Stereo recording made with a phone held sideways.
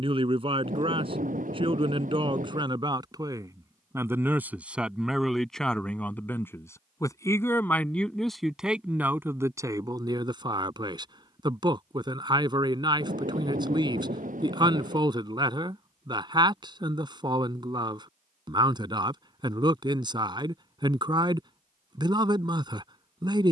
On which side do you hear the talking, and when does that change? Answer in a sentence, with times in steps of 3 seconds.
In this clip you hear the talking on the right from 0 s, in the centre from 3 s and on the right from 9 s.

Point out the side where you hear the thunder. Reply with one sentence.
You can hear the thunder on the right.